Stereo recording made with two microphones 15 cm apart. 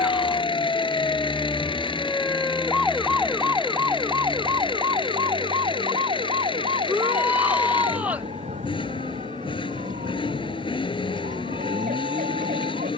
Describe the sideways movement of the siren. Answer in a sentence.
You can hear the siren move to the right.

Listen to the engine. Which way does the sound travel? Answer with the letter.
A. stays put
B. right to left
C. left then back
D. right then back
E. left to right
A.